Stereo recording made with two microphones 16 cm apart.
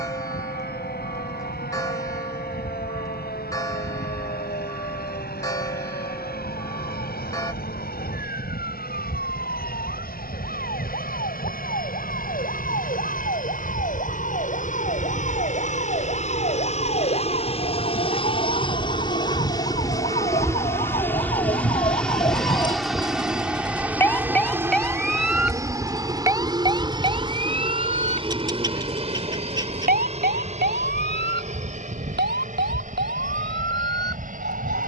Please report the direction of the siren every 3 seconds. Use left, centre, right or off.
left, left, left, left, left, left, left, left, centre, right, right, right.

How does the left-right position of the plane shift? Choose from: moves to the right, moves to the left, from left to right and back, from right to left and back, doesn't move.
moves to the right.